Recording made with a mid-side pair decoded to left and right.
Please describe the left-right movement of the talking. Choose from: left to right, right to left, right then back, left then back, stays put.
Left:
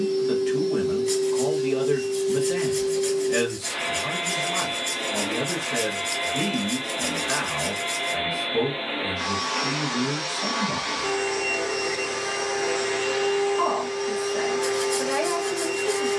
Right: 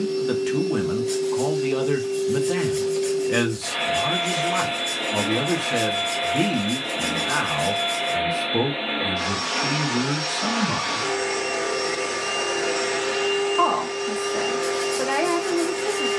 stays put.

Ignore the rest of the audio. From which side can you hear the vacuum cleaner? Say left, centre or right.
right.